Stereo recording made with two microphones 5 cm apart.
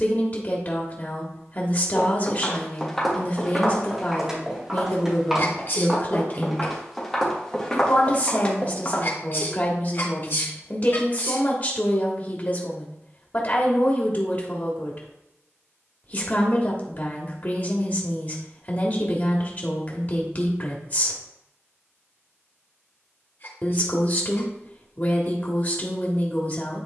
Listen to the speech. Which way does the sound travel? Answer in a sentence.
You can hear the speech stay put.